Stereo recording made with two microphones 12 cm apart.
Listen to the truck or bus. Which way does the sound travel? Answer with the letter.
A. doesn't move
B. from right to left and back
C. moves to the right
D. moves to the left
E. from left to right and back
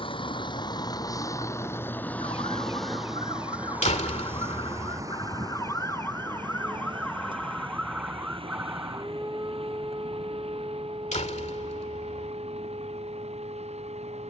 C.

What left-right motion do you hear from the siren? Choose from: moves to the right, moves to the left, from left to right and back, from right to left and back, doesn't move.
moves to the right.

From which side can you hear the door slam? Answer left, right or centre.
left.